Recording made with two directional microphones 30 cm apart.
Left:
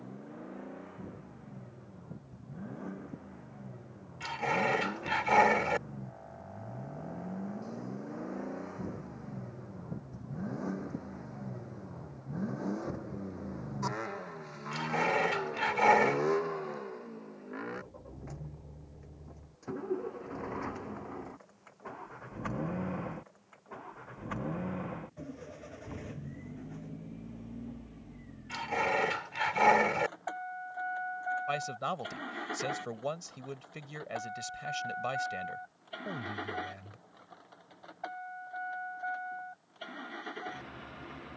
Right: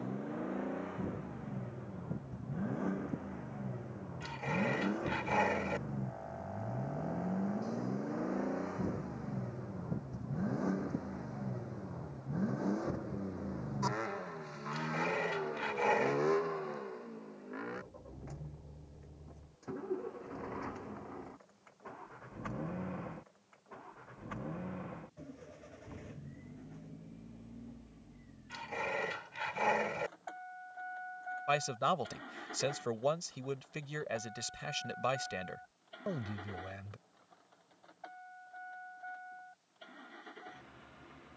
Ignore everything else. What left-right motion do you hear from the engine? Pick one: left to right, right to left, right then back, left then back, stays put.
right to left.